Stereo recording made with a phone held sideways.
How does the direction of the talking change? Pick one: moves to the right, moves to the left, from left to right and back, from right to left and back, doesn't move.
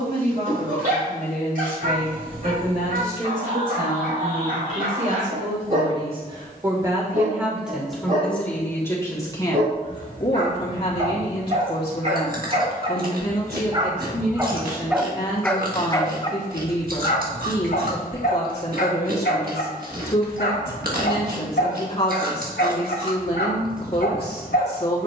moves to the left.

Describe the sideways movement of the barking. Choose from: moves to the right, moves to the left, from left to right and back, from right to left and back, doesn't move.
moves to the left.